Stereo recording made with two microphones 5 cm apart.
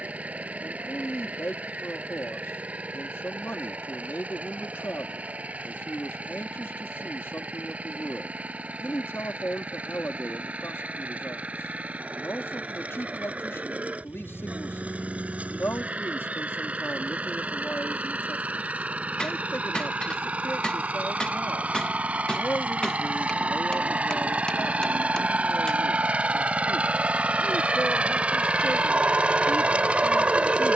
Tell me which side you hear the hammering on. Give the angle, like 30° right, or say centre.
20° left.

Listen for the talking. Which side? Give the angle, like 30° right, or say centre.
60° left.